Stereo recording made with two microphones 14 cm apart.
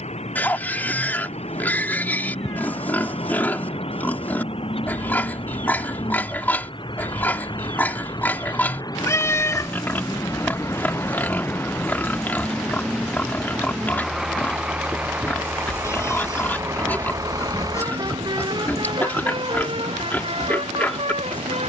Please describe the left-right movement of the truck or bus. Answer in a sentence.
In this clip you hear the truck or bus move from left to right.